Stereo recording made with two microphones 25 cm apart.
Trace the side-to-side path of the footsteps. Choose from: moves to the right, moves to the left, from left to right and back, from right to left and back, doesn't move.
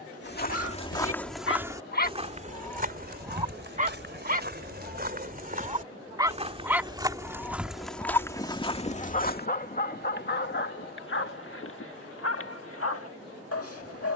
from left to right and back.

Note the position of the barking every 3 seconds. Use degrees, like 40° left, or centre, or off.
50° left, 20° right, 10° left, 40° left, 60° left.